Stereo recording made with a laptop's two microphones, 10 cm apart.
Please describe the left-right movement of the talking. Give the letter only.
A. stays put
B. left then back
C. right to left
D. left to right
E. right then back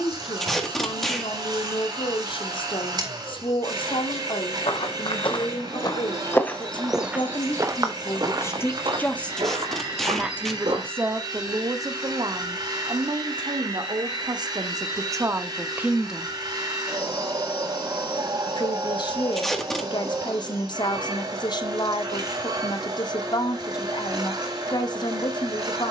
E.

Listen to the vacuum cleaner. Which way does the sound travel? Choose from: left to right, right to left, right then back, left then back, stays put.
stays put.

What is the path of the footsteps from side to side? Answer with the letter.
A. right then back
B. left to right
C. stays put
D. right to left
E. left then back
B.